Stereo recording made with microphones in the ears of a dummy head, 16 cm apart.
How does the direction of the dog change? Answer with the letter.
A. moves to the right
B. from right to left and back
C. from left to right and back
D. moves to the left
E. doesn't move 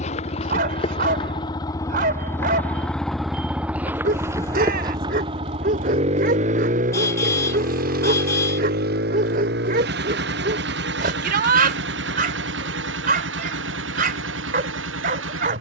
E.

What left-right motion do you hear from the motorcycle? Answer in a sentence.
You can hear the motorcycle move from left to right.